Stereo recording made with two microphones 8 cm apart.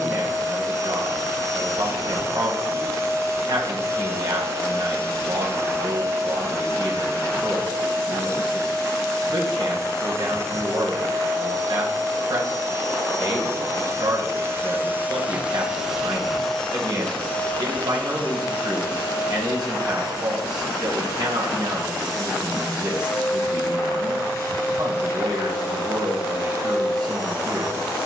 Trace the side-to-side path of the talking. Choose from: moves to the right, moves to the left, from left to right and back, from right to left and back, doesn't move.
doesn't move.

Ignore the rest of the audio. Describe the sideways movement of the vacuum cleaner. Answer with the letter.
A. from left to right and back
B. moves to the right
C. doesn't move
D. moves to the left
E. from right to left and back
D.